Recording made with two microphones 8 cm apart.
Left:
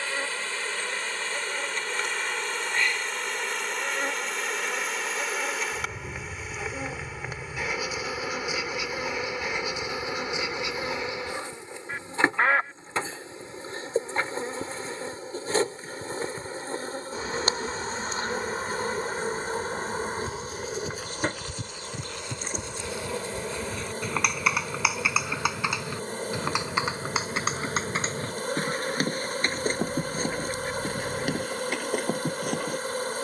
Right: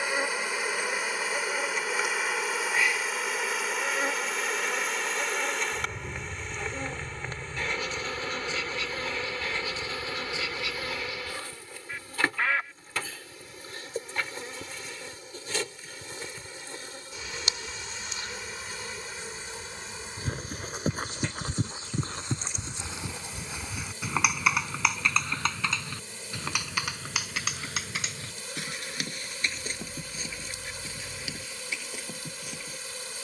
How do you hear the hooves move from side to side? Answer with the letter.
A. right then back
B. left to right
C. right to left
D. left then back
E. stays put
C.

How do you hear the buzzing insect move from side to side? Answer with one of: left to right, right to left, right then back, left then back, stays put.
right to left.